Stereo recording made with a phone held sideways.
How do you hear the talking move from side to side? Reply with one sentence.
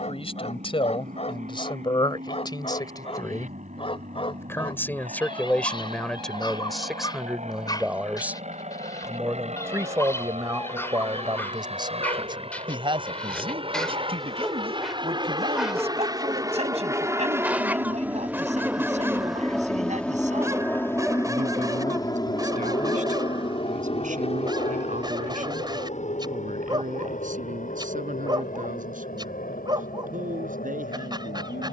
You can hear the talking go from the left side to the right.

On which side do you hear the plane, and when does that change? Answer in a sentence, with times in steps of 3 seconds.
You can hear the plane on the right from 0 s, in the centre from 18 s and on the left from 21 s.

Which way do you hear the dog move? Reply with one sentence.
You can hear the dog travel towards the right.